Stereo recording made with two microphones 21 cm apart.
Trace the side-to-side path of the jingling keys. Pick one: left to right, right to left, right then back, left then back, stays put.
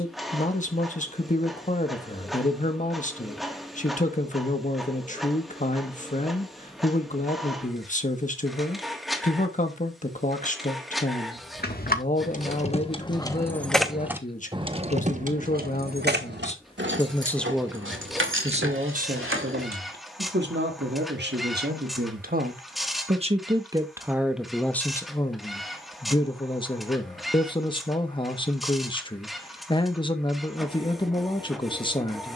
left to right.